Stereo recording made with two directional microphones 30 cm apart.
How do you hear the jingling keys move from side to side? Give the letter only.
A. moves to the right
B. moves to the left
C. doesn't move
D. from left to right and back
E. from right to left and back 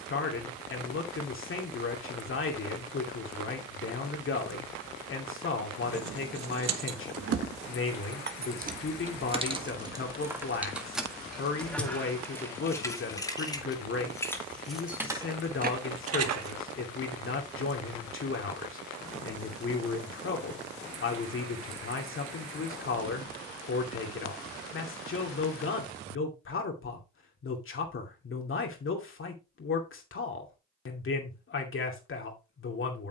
E.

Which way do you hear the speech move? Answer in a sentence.
You can hear the speech stay in one place.